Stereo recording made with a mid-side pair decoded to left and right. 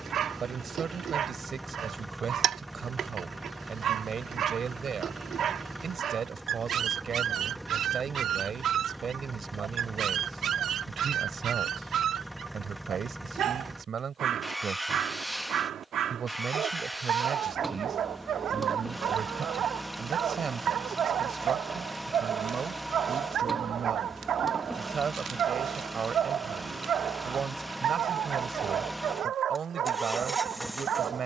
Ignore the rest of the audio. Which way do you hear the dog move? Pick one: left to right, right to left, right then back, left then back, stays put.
stays put.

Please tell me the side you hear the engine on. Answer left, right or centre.
centre.